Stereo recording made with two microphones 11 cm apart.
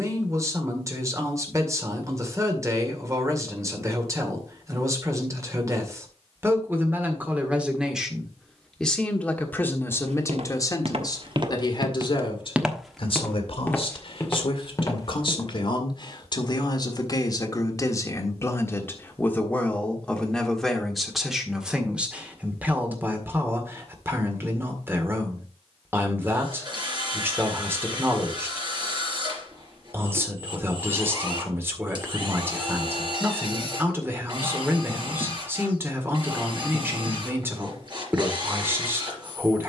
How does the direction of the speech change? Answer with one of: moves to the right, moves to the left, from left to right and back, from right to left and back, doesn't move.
from right to left and back.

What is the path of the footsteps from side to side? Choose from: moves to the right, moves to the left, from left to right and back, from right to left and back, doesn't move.
moves to the left.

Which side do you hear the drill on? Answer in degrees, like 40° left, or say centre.
40° right.